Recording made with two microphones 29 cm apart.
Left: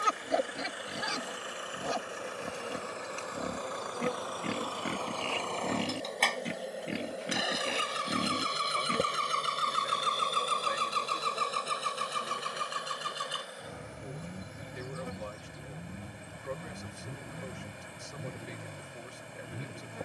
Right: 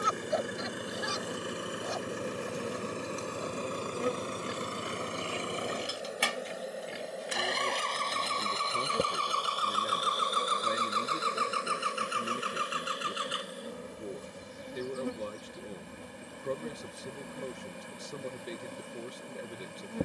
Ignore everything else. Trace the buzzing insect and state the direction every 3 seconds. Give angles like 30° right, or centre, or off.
40° right, 20° right, centre, 20° right, 40° right, 50° right, 50° right.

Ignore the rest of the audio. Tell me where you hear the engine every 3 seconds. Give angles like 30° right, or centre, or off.
50° right, 30° right, centre, 30° left, 50° left, 60° left, 70° left.